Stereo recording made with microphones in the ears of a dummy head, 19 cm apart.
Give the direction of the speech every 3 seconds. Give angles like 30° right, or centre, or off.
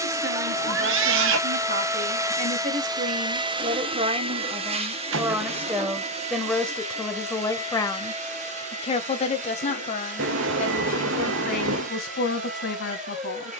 50° right, 20° right, 10° left, 40° left, 50° left.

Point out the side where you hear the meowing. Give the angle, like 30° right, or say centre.
70° right.